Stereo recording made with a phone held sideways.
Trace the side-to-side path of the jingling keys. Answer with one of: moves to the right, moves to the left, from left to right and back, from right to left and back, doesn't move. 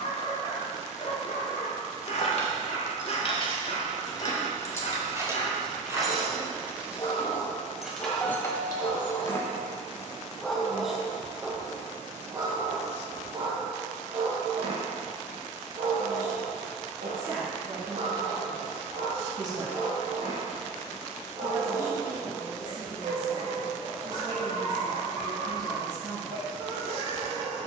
from left to right and back.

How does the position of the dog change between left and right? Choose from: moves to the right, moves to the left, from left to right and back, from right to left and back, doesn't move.
moves to the right.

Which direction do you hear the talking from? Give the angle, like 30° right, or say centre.
30° right.